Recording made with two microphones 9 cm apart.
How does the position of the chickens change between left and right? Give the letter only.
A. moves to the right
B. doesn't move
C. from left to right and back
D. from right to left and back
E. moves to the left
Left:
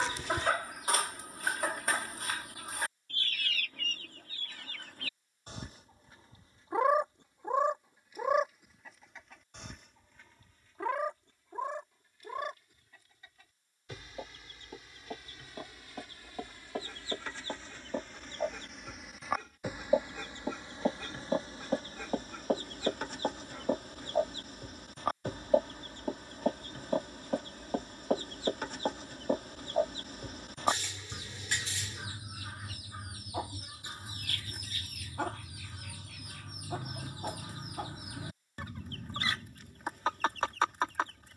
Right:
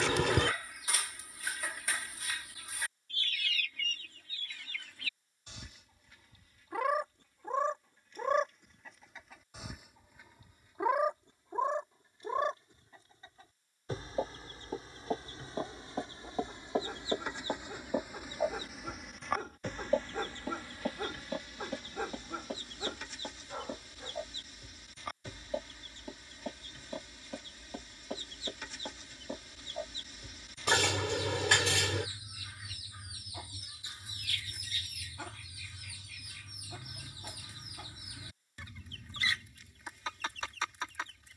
C.